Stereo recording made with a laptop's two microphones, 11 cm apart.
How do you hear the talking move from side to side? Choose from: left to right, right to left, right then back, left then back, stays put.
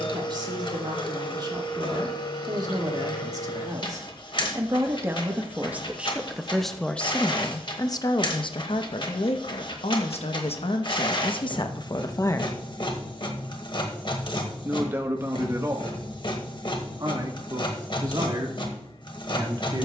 left then back.